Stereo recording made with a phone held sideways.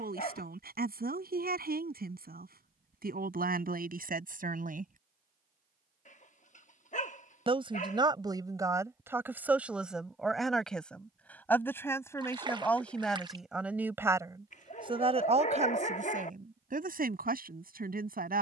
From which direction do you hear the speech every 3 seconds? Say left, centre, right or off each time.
right, right, right, centre, centre, right.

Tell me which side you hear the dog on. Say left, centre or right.
left.